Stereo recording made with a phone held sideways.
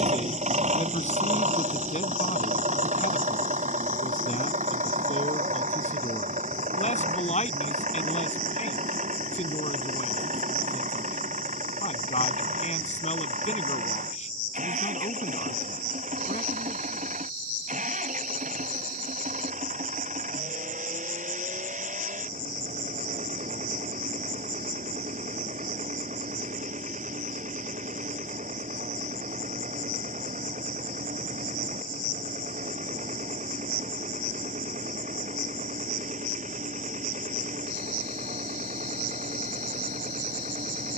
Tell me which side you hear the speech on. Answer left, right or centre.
left.